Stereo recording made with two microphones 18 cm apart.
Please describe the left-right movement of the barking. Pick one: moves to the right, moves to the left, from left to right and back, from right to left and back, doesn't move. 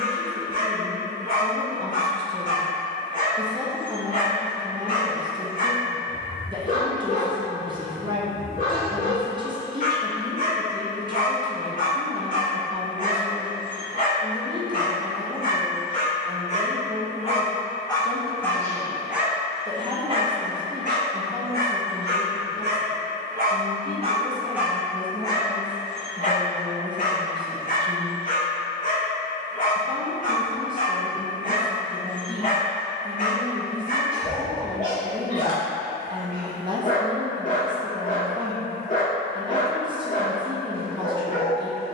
from left to right and back.